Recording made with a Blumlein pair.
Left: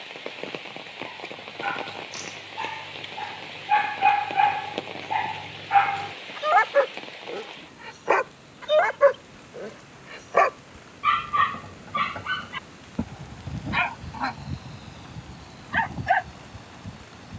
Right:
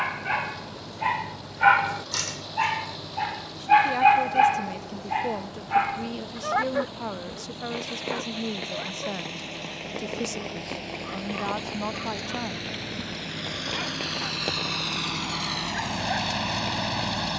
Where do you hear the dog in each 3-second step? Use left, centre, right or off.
right, centre, left, left, left, left.